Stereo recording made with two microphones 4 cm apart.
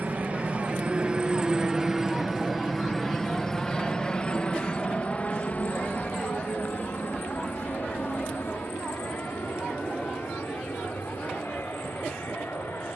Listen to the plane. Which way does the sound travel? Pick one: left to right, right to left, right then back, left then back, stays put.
right to left.